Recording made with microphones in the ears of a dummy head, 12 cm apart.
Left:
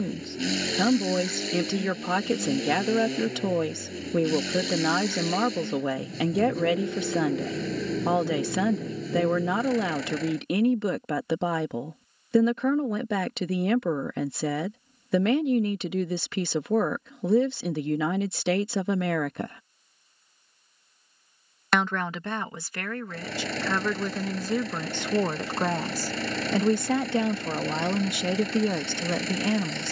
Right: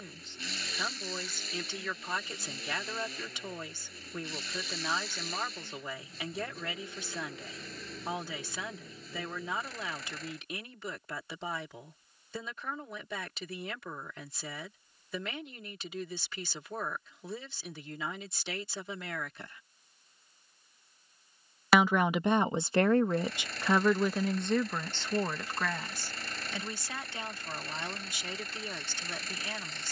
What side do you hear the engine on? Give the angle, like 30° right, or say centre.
50° left.